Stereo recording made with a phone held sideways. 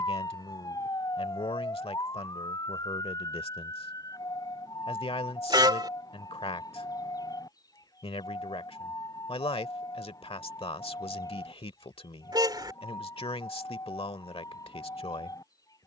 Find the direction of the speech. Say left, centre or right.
left.